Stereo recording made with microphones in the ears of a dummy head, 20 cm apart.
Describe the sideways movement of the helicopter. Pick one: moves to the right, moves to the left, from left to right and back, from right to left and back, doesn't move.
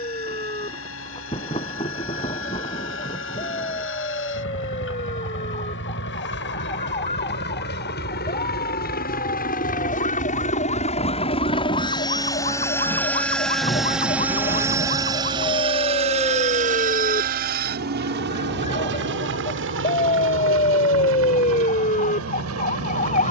moves to the right.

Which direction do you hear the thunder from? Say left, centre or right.
left.